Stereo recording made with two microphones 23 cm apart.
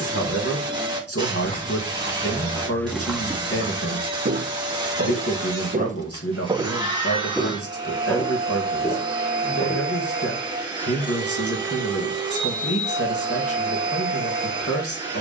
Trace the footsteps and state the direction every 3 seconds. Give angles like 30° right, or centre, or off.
30° left, 30° right, centre, 40° left, off.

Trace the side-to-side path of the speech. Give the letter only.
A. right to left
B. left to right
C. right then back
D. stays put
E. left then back
D.